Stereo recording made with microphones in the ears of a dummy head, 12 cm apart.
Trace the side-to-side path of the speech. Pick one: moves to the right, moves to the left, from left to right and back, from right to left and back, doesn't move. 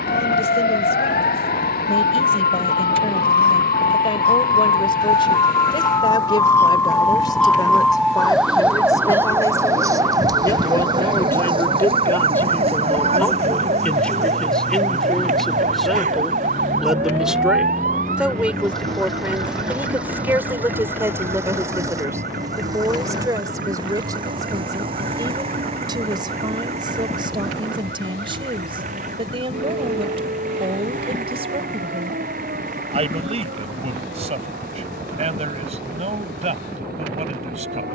moves to the right.